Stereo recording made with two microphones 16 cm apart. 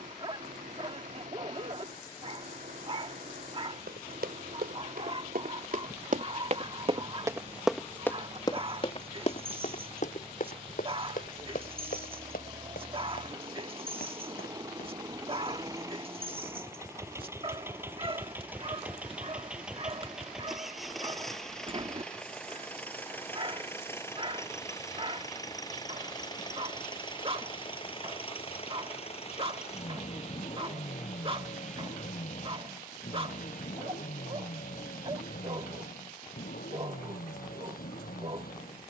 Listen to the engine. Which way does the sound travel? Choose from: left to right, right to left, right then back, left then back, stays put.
right to left.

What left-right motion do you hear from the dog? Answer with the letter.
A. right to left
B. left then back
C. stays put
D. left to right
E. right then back
C.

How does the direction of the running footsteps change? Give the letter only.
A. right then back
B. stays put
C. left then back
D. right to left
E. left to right
D.